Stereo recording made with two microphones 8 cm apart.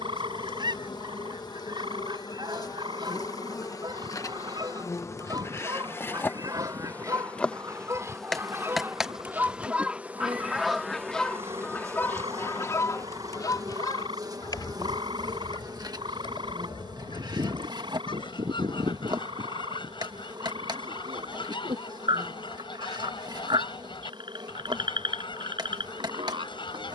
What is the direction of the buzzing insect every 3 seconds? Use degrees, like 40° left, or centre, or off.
60° left, 40° left, 10° left, 20° right, 40° right, 60° right, 60° right, 60° right, 60° right.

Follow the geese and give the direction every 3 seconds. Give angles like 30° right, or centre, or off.
60° right, 50° right, 40° right, centre, 50° left, 70° left, 80° left, 80° left, 80° left.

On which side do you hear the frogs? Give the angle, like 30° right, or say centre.
80° right.